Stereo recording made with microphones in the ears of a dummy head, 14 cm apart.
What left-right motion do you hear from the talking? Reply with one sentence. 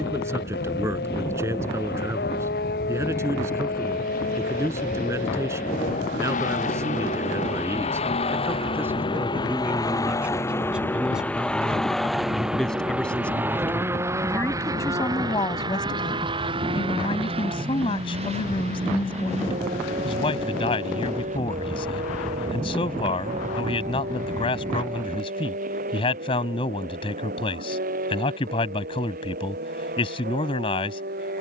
You can hear the talking go from the right side to the left.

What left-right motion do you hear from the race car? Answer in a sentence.
You can hear the race car move to the right.